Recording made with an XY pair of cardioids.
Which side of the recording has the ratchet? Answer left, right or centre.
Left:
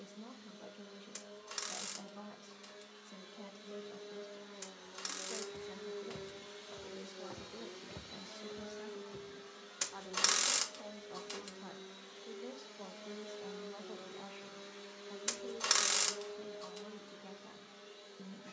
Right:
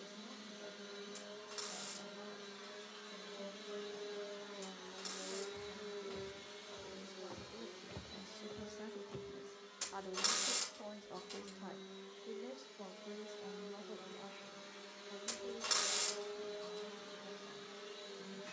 left.